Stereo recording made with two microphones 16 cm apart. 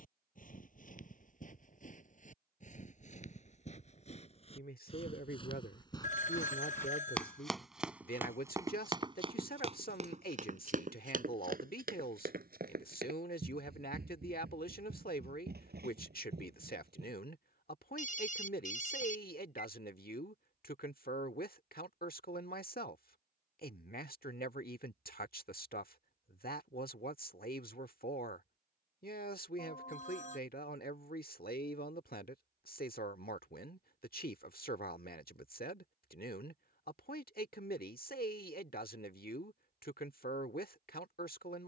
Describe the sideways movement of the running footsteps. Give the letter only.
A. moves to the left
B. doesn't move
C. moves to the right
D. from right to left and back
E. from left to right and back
C.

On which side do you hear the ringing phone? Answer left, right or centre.
left.